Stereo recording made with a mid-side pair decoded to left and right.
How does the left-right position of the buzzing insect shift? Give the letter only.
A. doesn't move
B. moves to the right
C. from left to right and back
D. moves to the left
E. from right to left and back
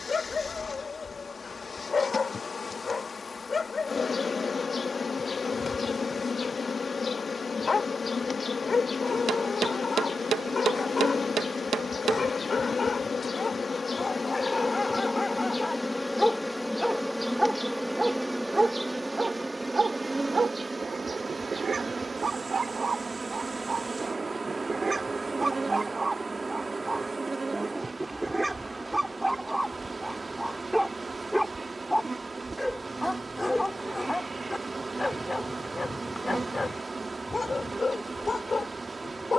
B.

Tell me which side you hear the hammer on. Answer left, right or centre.
right.